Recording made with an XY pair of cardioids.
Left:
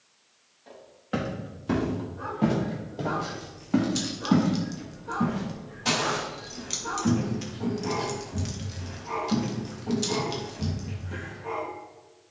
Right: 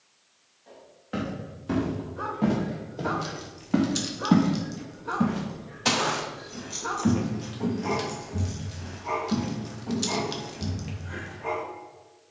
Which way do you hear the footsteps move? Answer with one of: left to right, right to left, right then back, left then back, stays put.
right then back.